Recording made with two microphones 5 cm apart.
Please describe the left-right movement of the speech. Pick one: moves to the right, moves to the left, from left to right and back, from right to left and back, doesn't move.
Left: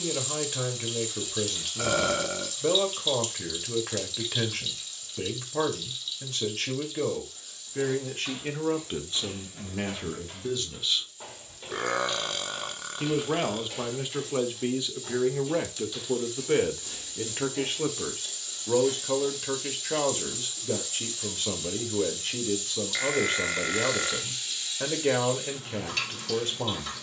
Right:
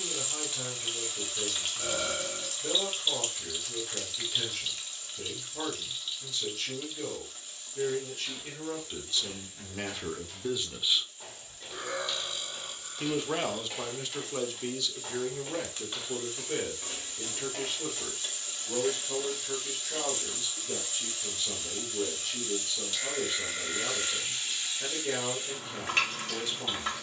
from left to right and back.